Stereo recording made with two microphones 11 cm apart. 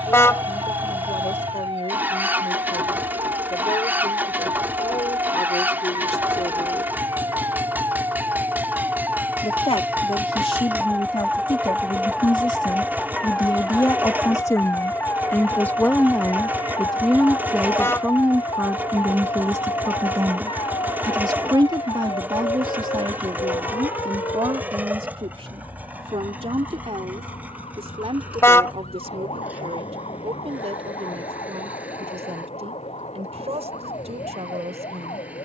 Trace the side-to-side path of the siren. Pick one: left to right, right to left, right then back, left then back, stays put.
right to left.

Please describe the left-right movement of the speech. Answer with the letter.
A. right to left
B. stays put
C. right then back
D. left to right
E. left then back
D.